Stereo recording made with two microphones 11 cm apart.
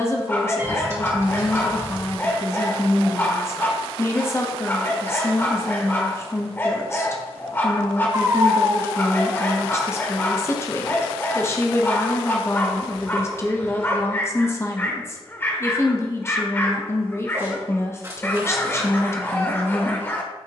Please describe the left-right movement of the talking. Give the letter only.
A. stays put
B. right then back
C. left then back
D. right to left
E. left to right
A.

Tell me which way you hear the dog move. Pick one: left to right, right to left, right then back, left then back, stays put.
stays put.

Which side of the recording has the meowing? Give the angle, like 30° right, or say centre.
30° right.